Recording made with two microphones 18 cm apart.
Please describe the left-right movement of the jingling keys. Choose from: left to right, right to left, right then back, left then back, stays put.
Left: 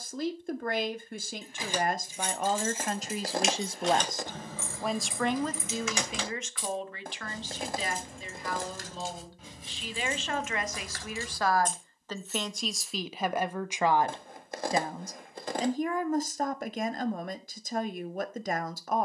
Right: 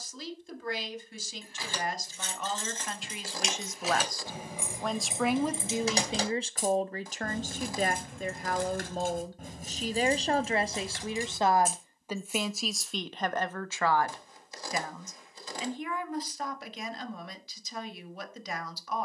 right then back.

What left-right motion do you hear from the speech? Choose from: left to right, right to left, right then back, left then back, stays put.
right then back.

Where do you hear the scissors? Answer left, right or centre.
left.